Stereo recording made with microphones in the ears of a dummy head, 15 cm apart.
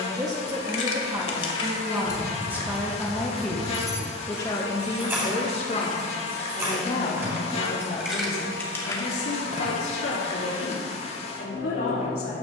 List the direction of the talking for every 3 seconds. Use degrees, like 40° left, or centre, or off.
20° right, 20° left, 60° left, 70° left.